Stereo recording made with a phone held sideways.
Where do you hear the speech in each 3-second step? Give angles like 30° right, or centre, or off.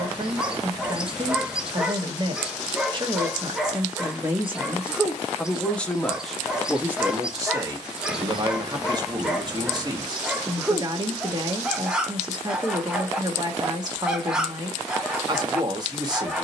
40° right, 20° right, 20° right, 30° right, 30° right, 30° right.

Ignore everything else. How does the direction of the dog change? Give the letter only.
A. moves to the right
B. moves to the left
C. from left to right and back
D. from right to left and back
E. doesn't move
E.